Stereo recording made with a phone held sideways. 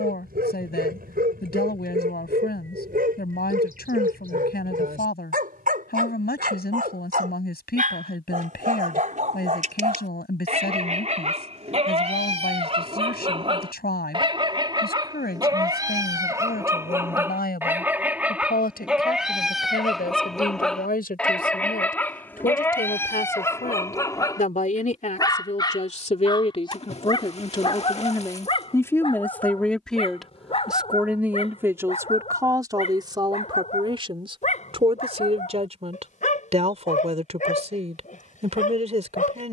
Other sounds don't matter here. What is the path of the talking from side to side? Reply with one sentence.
In this clip you hear the talking move from left to right.